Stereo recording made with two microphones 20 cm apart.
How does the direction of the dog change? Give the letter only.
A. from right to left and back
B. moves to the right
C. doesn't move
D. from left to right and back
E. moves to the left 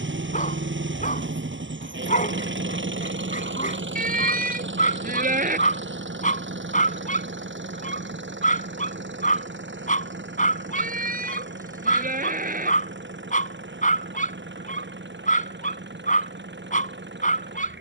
C.